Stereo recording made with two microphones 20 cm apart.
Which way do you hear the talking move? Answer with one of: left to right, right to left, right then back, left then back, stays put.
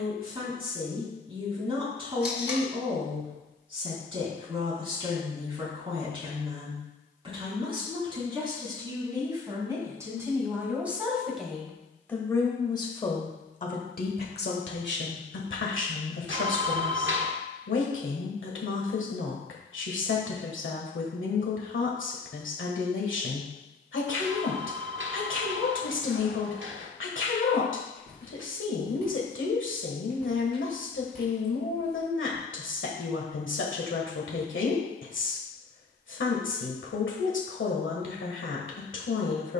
right to left.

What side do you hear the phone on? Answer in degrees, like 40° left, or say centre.
70° right.